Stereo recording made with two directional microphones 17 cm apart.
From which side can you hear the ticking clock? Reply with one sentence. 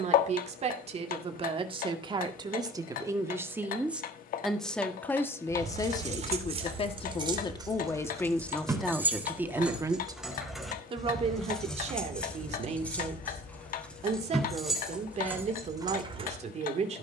You can hear the ticking clock on the left.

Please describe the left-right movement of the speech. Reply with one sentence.
In this clip you hear the speech move from right to left and back again.